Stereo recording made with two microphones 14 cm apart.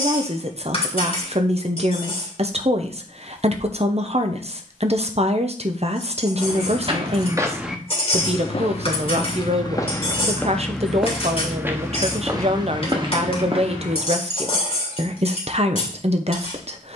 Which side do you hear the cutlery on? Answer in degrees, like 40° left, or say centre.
40° left.